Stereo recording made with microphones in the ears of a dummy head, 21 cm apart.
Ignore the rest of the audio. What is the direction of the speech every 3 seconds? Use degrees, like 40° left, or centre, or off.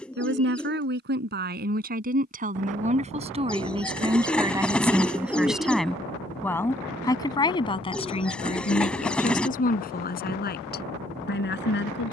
40° right, 10° right, 20° left, 40° left.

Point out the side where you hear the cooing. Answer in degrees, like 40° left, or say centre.
centre.